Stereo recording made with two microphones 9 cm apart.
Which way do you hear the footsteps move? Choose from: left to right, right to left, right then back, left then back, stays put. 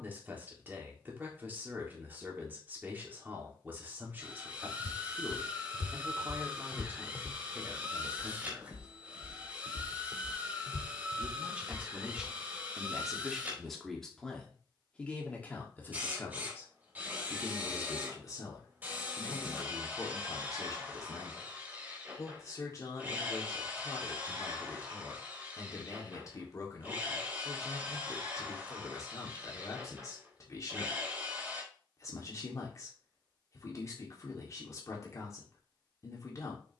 right then back.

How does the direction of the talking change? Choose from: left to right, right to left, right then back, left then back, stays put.
right to left.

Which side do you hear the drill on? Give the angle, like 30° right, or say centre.
20° right.